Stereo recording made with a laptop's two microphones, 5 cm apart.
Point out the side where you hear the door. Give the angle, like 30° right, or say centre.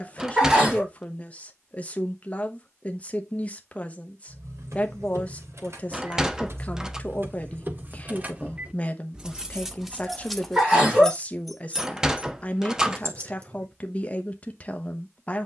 10° right.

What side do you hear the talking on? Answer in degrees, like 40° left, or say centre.
30° left.